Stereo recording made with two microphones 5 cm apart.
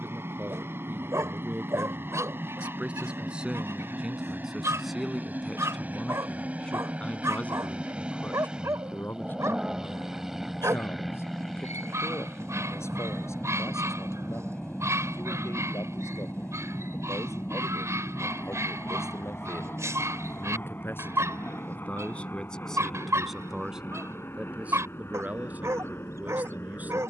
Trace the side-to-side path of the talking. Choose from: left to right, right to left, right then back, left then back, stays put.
left then back.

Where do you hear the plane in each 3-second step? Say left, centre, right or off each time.
right, right, right, centre, centre, left, left, left, left.